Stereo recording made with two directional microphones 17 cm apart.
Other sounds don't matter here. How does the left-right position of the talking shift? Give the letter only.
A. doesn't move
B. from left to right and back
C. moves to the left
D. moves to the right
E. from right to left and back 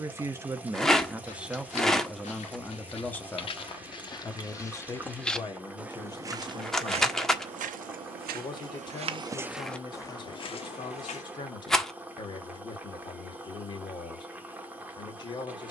C.